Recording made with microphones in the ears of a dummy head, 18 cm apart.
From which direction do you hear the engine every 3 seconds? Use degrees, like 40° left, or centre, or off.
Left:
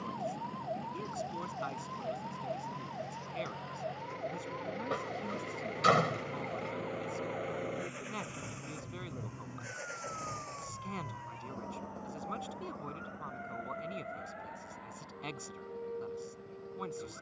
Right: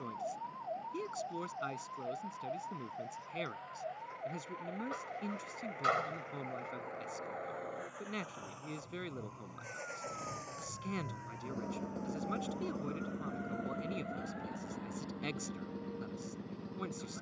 70° left, 60° left, 40° left, centre, 50° right, 70° right.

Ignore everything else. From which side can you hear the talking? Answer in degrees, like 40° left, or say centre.
20° right.